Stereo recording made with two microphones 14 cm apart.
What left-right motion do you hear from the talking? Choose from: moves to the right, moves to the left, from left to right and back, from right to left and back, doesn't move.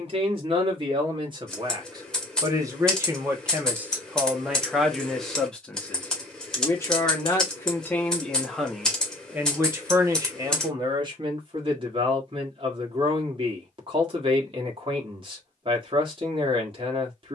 from right to left and back.